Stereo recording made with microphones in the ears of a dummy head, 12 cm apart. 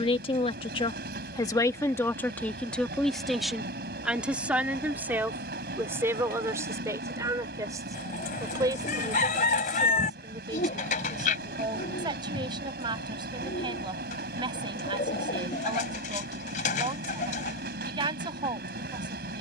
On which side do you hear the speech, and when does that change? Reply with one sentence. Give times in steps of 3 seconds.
You can hear the speech on the left from 0 s, in the centre from 3 s and on the right from 6 s.